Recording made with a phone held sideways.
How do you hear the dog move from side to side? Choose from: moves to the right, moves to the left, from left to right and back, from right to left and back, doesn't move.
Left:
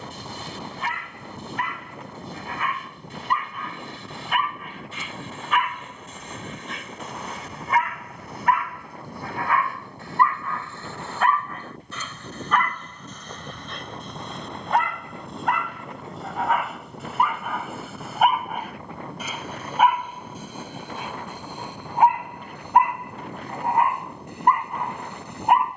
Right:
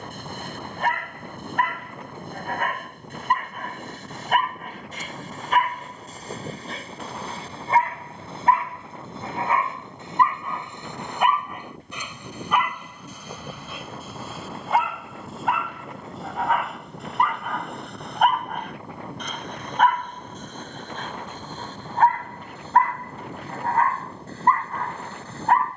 moves to the left.